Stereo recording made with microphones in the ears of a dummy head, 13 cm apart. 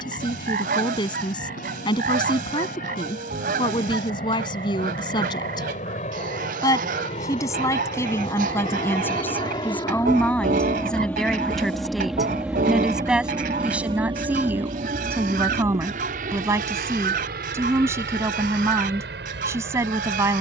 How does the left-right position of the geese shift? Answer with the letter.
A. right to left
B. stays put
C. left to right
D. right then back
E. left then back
B.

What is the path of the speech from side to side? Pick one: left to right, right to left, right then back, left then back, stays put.
left to right.